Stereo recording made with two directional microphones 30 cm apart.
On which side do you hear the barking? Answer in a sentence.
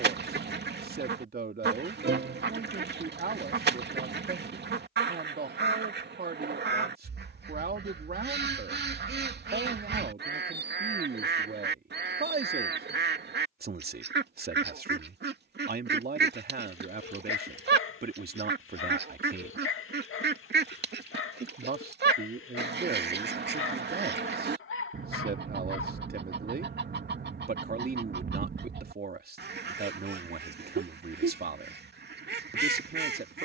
You can hear the barking on the left.